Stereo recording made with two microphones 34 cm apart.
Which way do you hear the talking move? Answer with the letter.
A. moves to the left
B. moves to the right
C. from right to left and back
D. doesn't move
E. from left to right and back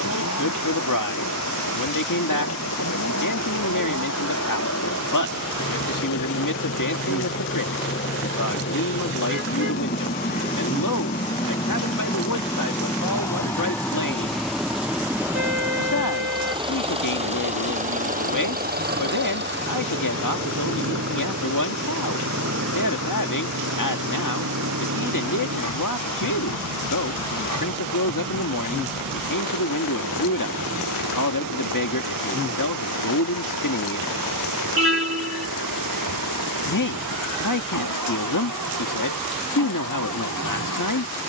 D.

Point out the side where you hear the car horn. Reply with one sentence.
In this clip you hear the car horn on the right.